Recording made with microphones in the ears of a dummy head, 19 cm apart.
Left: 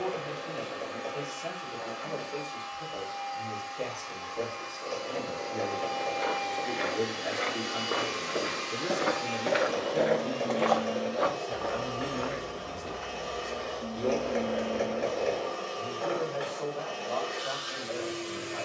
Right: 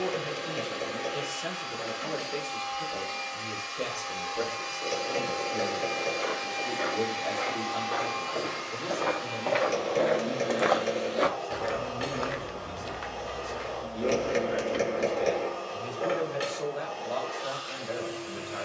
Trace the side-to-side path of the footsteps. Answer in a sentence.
In this clip you hear the footsteps travel towards the right.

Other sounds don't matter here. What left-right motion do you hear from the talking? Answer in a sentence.
In this clip you hear the talking move from right to left and back again.